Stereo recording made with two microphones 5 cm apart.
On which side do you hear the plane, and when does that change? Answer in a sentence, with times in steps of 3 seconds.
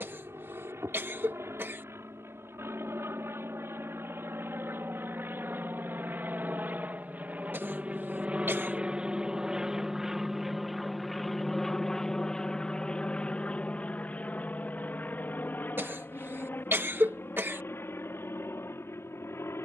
In this clip you hear the plane on the right from 0 s, in the centre from 9 s and on the left from 12 s.